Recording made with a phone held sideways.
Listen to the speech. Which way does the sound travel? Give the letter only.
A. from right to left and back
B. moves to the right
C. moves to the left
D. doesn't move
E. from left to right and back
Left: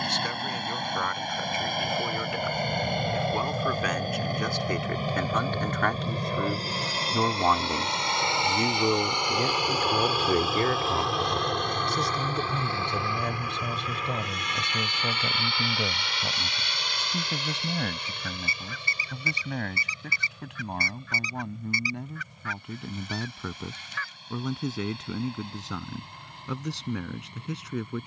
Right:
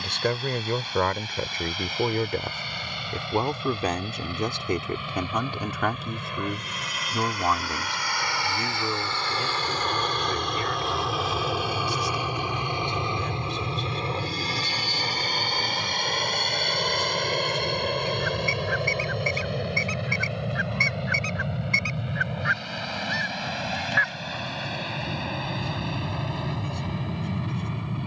C.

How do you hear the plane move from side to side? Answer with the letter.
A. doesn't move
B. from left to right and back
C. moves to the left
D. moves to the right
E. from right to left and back
D.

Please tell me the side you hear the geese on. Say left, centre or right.
right.